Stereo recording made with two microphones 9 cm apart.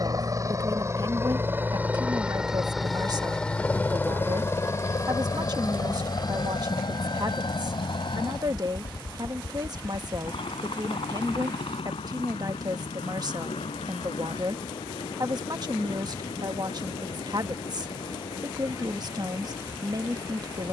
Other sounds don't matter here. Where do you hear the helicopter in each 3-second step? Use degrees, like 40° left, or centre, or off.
20° right, 30° left, 50° left, 70° left, 70° left, 80° left, 80° left.